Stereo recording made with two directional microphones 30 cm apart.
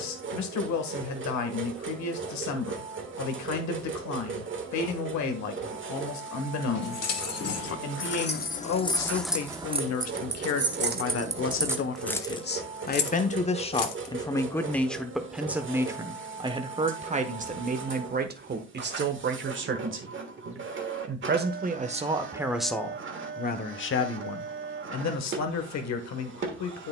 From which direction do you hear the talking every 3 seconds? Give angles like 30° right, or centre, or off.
70° left, 70° left, 70° left, 50° left, 20° left, 20° right, 40° right, centre, 60° left.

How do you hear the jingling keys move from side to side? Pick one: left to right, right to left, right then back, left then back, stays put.
right then back.